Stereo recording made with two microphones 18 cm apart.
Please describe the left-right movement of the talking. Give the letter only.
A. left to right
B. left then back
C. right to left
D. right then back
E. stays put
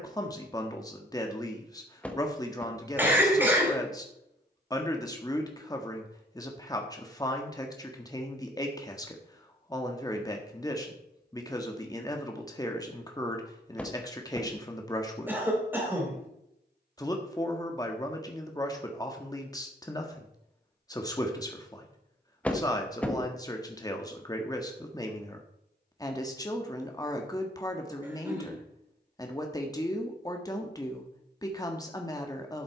E.